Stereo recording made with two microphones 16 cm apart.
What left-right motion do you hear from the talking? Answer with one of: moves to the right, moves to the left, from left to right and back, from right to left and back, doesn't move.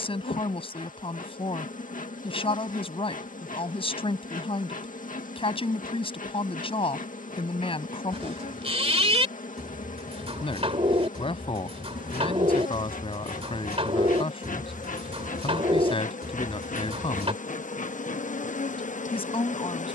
doesn't move.